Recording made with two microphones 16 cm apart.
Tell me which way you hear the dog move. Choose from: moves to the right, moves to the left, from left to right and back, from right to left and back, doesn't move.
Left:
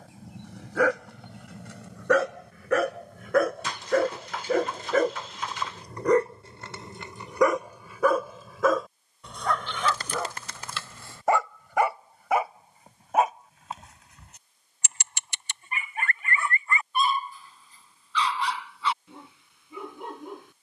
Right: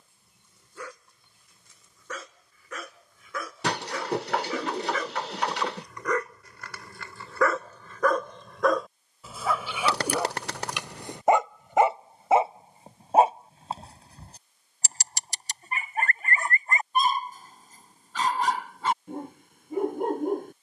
moves to the right.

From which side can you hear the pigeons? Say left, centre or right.
right.